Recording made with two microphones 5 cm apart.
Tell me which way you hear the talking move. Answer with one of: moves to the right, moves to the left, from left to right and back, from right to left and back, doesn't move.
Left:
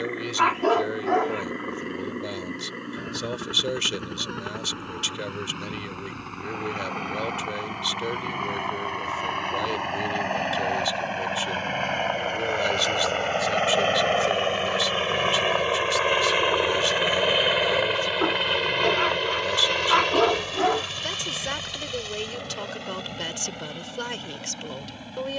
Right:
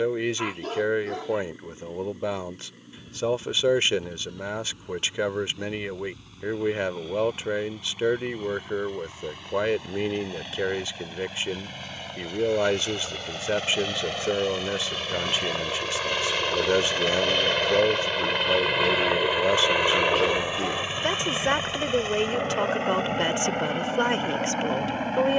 doesn't move.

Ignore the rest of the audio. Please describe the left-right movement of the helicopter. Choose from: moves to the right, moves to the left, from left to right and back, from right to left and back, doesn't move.
moves to the right.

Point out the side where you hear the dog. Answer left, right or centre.
left.